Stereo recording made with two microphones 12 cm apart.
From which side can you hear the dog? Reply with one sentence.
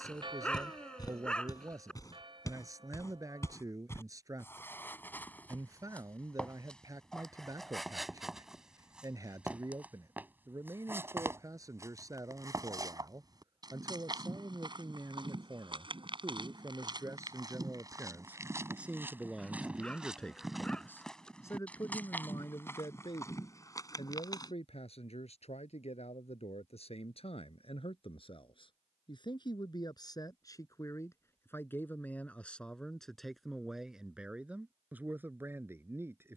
You can hear the dog in the centre.